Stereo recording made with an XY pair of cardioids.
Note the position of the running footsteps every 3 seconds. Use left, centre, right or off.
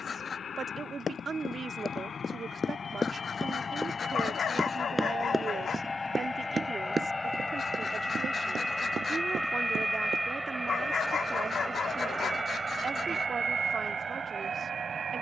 left, centre, right, right, off.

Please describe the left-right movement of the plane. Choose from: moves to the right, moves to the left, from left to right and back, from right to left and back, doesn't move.
moves to the right.